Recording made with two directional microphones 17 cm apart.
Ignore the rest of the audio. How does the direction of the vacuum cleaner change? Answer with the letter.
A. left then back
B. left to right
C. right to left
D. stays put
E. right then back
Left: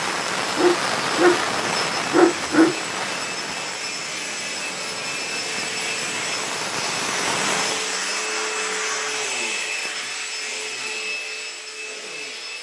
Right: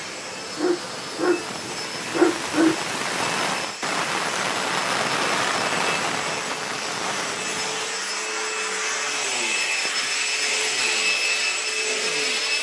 B.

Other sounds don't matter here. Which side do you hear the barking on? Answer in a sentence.
You can hear the barking on the left.